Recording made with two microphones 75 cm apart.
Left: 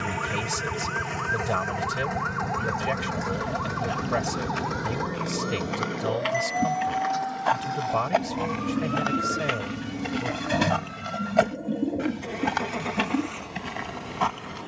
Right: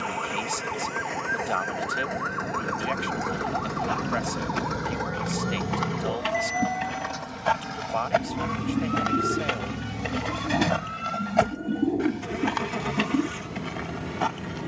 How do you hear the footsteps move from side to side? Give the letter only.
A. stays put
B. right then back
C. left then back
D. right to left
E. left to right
D.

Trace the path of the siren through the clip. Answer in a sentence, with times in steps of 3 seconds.
In this clip you hear the siren on the left from 0 s, in the centre from 3 s and on the right from 6 s.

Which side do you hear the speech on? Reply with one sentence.
In this clip you hear the speech on the left.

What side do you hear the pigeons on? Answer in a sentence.
You can hear the pigeons in the centre.